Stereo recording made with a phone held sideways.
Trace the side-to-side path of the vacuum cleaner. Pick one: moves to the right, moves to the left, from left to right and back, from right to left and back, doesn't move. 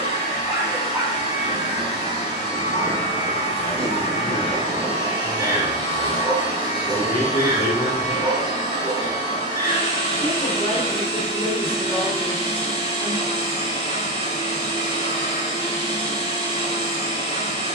doesn't move.